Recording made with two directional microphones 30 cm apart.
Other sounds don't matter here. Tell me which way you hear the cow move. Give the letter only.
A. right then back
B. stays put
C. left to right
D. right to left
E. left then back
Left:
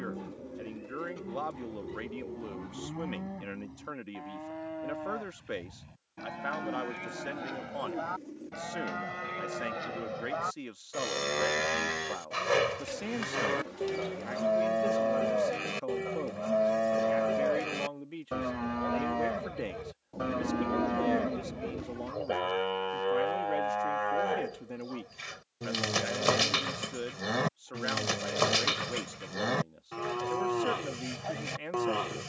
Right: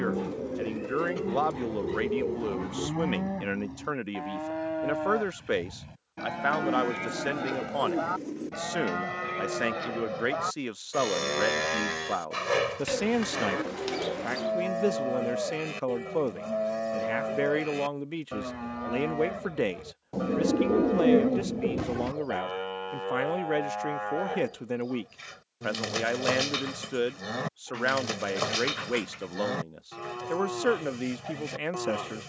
D.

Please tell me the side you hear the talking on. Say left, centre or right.
right.